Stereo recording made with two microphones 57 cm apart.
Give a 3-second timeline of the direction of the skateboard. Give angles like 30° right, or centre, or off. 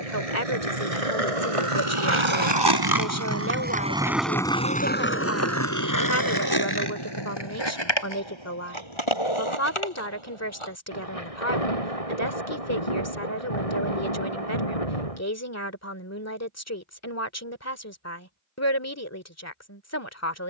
60° right, centre, 40° left, 50° left, off, off, off.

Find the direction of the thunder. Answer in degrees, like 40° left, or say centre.
70° left.